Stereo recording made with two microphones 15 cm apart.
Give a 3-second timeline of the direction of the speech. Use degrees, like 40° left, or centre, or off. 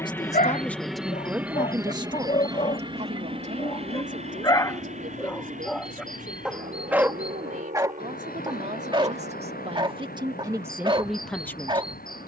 10° right, 60° right, 60° right, 20° right.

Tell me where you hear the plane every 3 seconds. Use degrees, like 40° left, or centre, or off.
10° right, 40° right, 60° right, 60° right.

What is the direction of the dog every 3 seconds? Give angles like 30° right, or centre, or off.
60° left, 20° left, 20° right, 30° right.